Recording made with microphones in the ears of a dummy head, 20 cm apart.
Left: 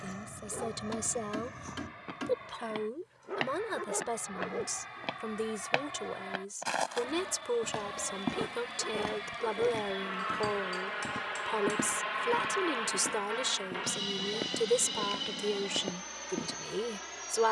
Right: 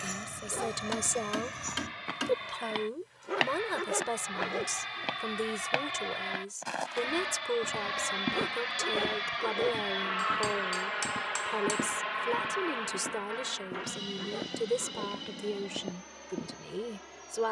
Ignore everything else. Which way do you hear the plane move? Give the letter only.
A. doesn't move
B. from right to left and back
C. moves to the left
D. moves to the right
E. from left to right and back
C.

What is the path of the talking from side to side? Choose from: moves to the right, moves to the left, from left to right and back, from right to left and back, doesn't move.
moves to the left.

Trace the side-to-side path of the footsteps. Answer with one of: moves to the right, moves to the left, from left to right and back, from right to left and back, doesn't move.
moves to the left.